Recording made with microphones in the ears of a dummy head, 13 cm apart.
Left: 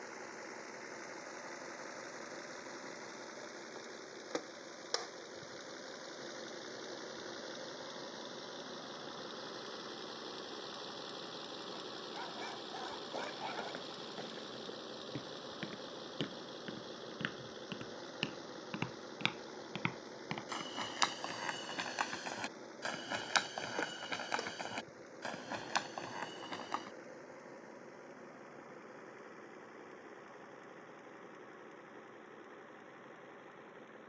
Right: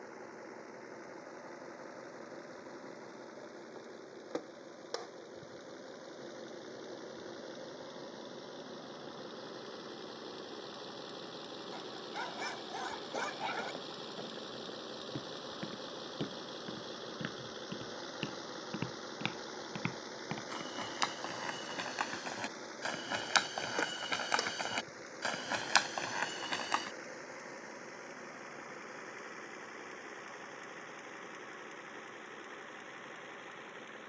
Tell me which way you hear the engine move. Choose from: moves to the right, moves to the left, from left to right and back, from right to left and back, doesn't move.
moves to the right.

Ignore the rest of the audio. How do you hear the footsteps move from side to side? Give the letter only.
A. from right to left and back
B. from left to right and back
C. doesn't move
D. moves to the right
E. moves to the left
D.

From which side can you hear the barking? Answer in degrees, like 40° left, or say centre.
30° right.